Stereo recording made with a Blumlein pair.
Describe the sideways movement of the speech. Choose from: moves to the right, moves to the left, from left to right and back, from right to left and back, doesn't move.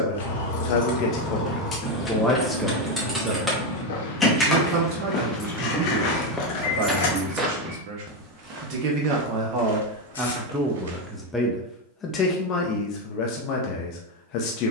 from left to right and back.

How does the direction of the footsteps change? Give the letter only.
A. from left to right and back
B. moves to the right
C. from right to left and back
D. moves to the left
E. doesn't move
B.